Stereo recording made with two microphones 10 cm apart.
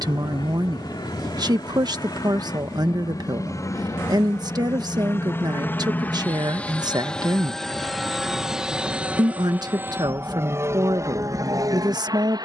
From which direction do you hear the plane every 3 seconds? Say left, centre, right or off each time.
left, left, centre, right.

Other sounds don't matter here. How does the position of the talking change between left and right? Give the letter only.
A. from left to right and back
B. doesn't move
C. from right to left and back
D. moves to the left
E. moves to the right
B.